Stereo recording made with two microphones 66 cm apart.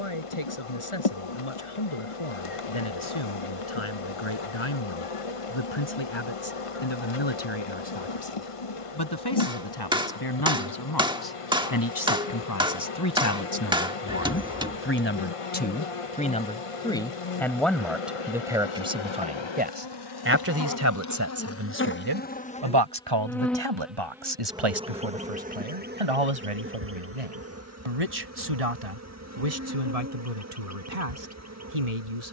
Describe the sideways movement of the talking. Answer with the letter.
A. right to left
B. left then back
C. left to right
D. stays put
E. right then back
C.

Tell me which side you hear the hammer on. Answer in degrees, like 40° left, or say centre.
10° right.